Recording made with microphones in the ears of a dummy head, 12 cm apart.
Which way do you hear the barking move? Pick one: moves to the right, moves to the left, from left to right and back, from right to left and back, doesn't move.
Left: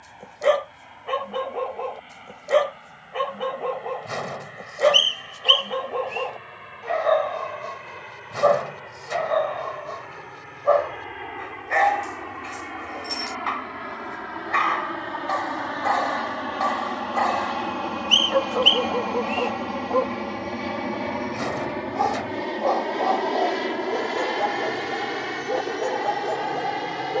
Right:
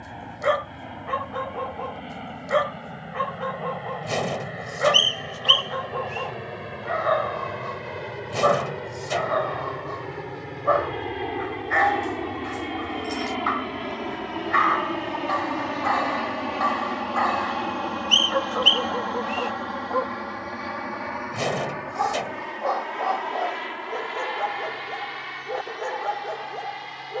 doesn't move.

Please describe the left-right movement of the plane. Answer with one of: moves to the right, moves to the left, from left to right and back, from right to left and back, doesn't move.
moves to the left.